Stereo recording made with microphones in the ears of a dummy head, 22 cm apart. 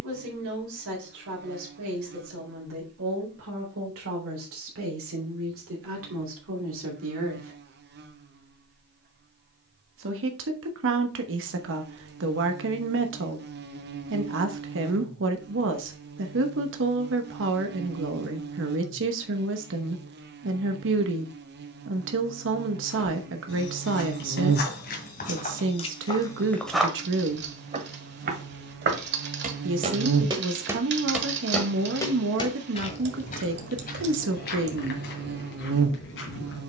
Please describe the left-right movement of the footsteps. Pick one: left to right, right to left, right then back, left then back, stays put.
right then back.